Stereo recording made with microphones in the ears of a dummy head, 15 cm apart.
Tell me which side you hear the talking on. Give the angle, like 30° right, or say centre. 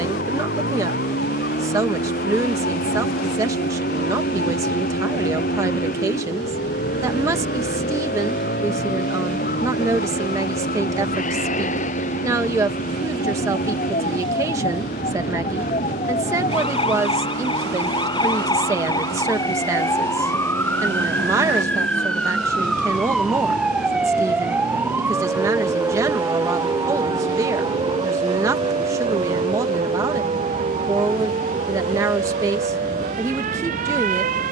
20° right.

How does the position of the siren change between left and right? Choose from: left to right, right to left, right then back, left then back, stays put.
left to right.